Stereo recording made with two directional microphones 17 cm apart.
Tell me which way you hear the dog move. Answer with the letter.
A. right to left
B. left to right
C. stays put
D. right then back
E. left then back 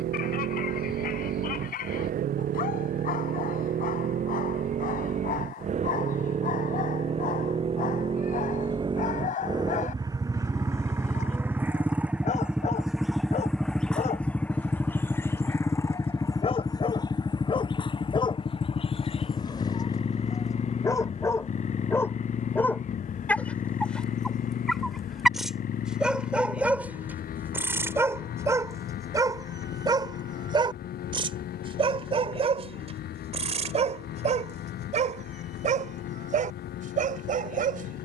B.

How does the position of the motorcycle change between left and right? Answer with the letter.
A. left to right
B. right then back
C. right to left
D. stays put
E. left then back
C.